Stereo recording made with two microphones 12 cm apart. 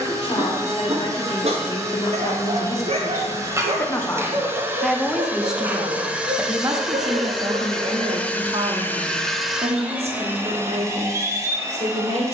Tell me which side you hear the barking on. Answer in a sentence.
In this clip you hear the barking on the right.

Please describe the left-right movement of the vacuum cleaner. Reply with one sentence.
In this clip you hear the vacuum cleaner move from right to left and back again.